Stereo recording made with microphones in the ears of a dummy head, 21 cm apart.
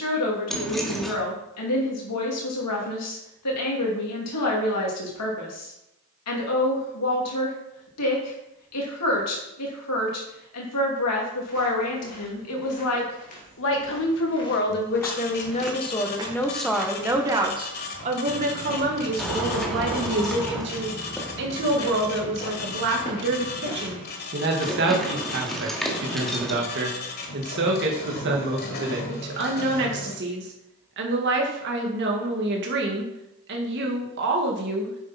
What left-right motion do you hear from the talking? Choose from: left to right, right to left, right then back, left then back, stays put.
left to right.